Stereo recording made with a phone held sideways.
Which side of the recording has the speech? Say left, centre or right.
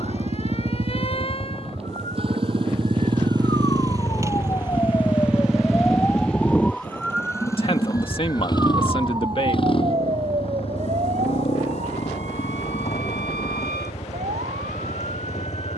left.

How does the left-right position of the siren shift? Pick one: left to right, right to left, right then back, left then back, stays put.
left to right.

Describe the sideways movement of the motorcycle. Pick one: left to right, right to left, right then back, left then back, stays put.
right to left.